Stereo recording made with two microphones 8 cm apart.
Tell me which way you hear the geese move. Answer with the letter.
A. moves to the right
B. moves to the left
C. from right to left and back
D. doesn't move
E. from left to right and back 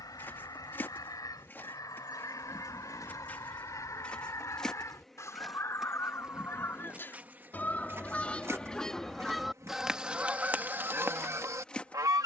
A.